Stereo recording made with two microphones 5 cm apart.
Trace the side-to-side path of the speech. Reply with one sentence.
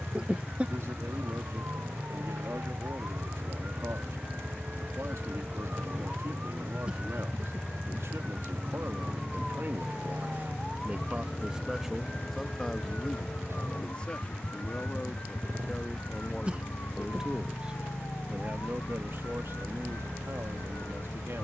In this clip you hear the speech move from right to left and back again.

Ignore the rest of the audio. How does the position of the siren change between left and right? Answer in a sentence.
You can hear the siren go from the right side to the left.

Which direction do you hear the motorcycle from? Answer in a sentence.
In this clip you hear the motorcycle on the right.